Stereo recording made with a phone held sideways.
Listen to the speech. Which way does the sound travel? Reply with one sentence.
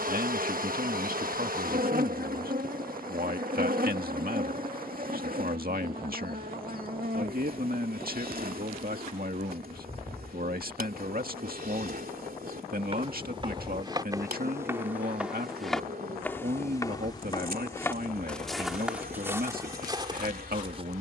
You can hear the speech stay in one place.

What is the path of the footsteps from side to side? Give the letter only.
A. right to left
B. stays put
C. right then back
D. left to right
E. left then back
E.